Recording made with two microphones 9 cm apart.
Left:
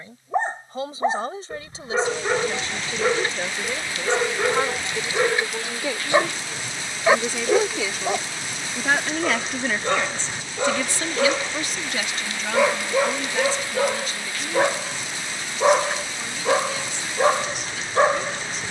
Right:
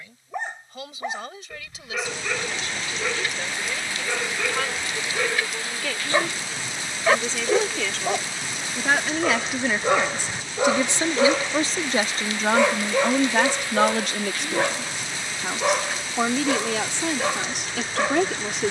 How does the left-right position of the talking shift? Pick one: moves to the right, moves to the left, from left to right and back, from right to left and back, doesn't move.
moves to the right.